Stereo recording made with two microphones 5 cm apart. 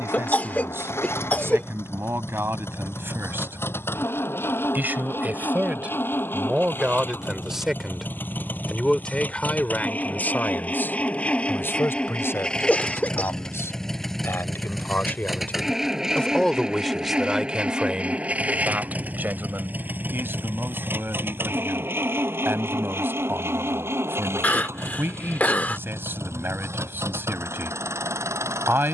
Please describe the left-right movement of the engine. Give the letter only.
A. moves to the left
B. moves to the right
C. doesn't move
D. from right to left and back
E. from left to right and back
B.